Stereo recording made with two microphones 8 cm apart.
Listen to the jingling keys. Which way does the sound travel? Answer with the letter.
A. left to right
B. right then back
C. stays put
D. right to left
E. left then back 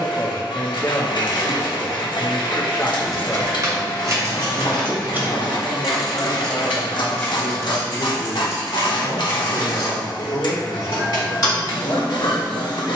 D.